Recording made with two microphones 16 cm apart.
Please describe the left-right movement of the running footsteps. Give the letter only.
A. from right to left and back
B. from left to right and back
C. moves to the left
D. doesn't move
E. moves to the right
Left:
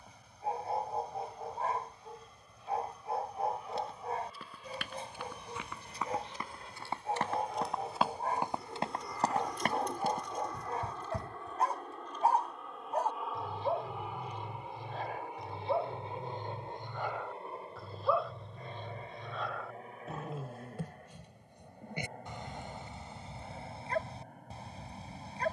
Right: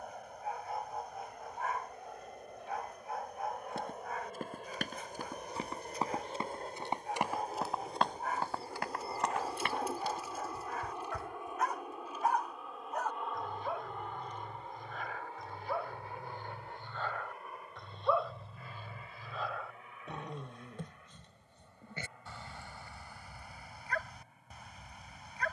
C.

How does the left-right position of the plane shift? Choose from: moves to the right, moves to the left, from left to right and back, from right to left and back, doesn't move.
moves to the left.